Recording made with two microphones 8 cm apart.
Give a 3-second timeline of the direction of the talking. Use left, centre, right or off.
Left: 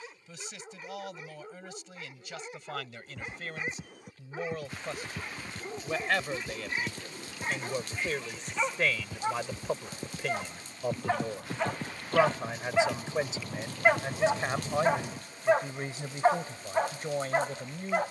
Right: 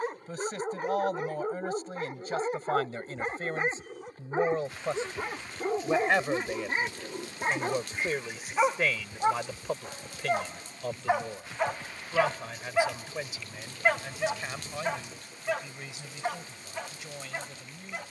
right, right, centre, centre, left, left.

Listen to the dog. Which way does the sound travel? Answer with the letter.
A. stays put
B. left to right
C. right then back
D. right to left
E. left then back
D.